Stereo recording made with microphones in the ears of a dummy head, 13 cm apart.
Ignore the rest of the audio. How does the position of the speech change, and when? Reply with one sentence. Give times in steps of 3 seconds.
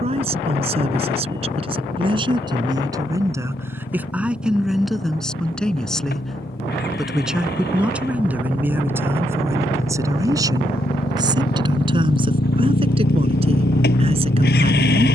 In this clip you hear the speech on the right from 0 s, in the centre from 3 s and on the right from 9 s.